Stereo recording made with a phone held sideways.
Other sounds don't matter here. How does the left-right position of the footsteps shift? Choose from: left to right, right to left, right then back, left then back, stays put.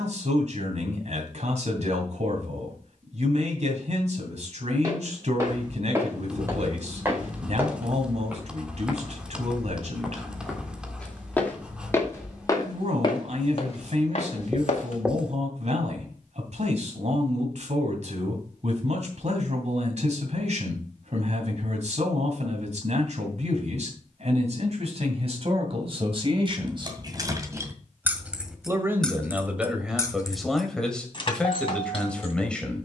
right to left.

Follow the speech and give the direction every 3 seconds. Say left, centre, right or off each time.
right, right, right, right, right, right, right, right, right, centre, centre.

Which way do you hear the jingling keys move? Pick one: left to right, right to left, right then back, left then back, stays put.
right to left.